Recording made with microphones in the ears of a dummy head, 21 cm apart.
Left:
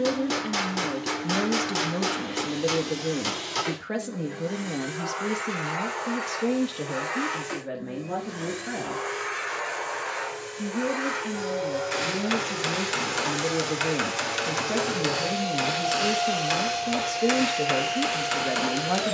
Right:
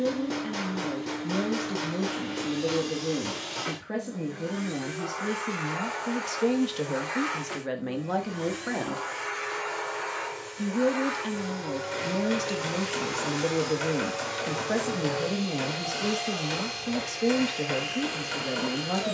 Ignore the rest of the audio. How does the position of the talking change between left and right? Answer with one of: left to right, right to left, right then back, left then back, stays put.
right then back.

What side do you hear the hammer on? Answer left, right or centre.
left.